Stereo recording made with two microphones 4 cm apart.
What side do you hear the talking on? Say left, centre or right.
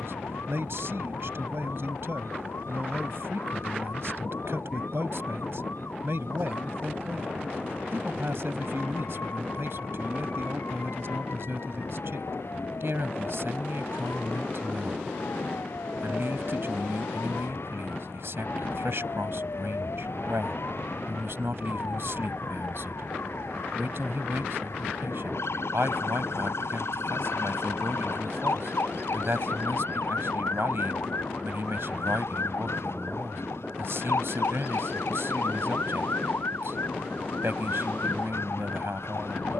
right.